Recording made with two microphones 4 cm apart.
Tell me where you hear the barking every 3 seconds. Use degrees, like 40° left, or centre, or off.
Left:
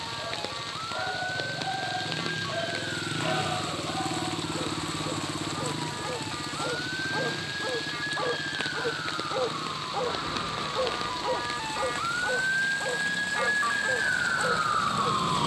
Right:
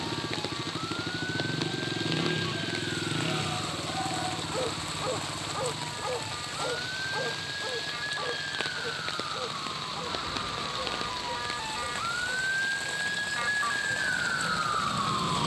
60° left, centre, 10° left, 50° left, 60° left.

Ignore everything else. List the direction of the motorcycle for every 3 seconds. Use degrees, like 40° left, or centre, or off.
50° right, 30° left, 60° left, 70° left, 70° left.